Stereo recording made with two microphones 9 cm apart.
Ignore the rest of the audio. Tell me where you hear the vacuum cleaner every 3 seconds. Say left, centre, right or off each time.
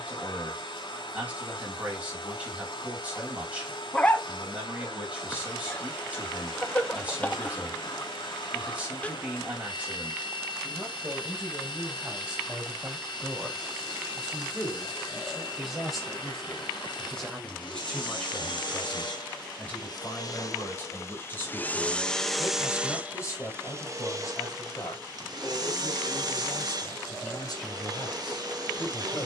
left, left, left, left, left, left, left, centre, right, right.